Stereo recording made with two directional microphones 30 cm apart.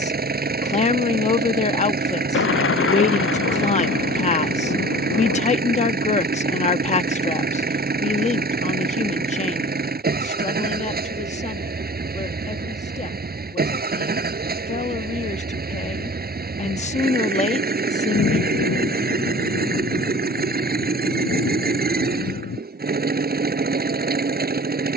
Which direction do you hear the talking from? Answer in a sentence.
You can hear the talking on the left.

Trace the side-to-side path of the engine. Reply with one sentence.
In this clip you hear the engine stay in one place.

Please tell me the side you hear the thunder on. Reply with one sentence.
In this clip you hear the thunder on the left.